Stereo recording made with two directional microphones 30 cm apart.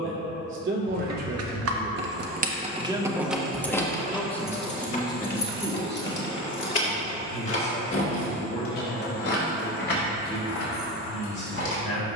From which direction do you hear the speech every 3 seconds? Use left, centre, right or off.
right, centre, left, left.